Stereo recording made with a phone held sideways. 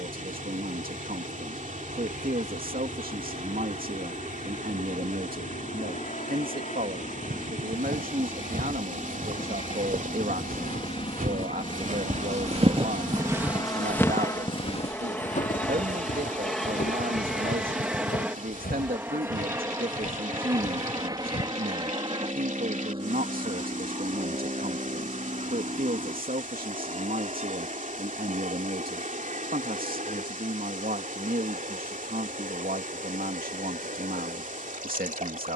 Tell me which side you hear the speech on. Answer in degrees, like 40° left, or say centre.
70° right.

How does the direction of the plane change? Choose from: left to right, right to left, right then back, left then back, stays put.
left to right.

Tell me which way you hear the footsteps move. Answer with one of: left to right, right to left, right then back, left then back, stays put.
right to left.